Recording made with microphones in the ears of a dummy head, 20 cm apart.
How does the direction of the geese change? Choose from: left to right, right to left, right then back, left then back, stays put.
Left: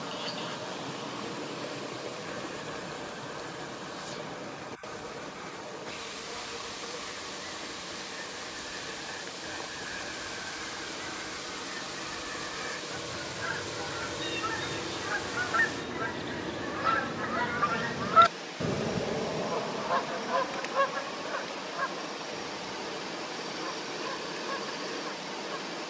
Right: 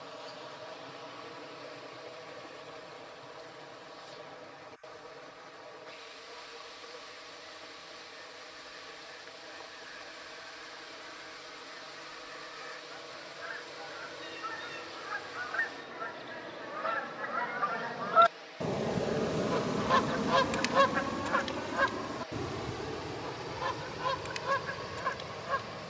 left to right.